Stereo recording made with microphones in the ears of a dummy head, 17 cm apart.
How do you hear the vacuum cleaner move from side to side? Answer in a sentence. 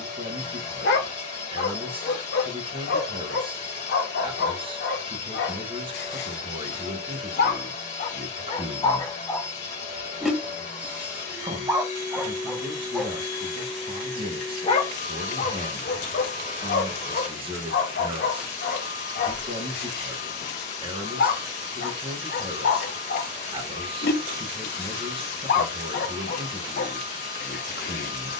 You can hear the vacuum cleaner stay in one place.